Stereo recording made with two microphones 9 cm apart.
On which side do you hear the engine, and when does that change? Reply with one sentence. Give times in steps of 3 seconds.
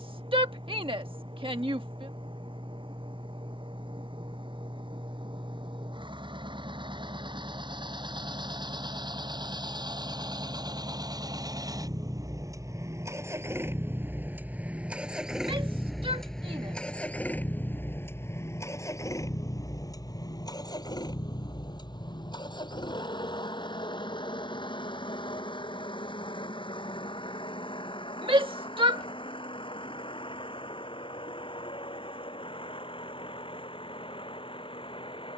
You can hear the engine on the right from 0 s, in the centre from 15 s and on the left from 18 s.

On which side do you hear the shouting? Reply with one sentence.
In this clip you hear the shouting on the right.